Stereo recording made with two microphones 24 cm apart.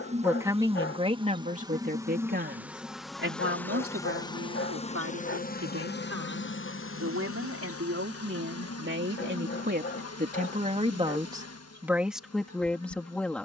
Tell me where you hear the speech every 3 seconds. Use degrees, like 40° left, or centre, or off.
30° right, 60° right, 60° right, 30° right, centre.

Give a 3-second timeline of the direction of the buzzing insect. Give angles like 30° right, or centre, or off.
20° right, 20° left, 60° left, 80° left, 80° left.